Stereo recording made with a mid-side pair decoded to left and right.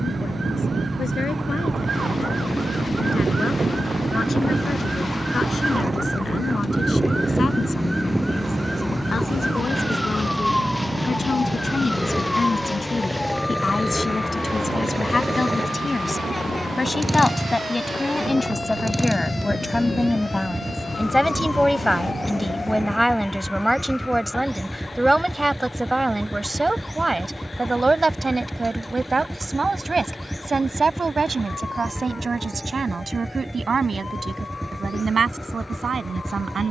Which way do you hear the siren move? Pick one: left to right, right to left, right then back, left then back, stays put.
right to left.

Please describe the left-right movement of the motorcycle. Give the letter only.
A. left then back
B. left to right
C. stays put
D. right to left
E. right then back
C.